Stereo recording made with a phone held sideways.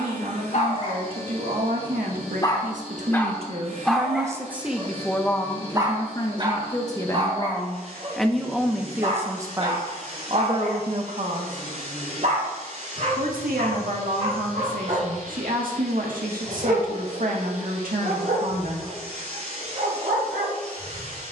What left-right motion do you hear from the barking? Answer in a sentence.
You can hear the barking move to the right.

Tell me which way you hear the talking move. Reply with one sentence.
In this clip you hear the talking go left and come back.